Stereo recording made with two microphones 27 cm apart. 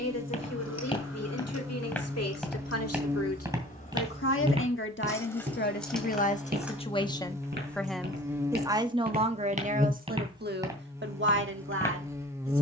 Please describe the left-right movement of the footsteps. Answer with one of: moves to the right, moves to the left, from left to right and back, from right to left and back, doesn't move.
from left to right and back.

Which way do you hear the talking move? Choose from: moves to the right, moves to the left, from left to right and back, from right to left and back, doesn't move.
moves to the right.